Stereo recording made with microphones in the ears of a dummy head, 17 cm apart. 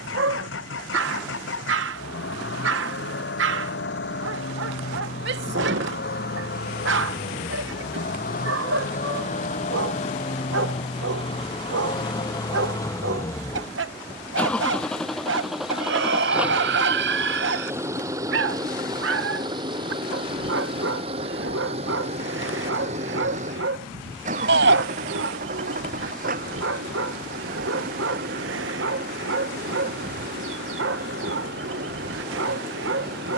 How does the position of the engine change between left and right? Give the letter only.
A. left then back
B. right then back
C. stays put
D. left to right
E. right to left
D.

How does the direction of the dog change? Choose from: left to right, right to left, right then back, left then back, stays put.
stays put.